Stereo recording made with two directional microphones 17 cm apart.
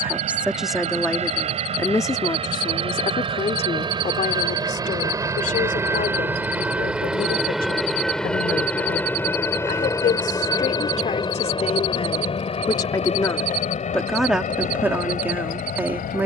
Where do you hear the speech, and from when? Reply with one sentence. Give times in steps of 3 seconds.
In this clip you hear the speech in the centre from 0 s, on the left from 3 s and in the centre from 12 s.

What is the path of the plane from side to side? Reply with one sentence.
You can hear the plane travel towards the left.